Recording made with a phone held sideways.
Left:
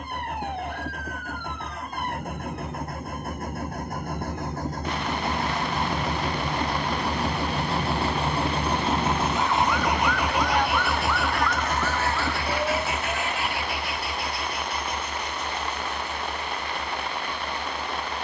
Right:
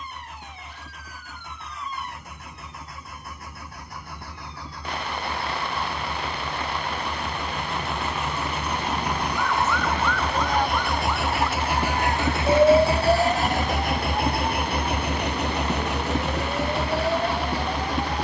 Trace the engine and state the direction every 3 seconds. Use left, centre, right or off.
left, left, left, centre, right, right.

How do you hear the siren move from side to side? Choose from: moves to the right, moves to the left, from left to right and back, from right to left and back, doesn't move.
moves to the right.